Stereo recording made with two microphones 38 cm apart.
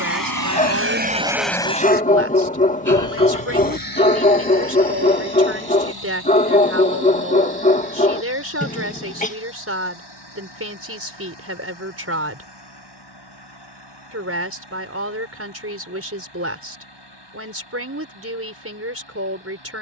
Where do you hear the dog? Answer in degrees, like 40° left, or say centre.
20° left.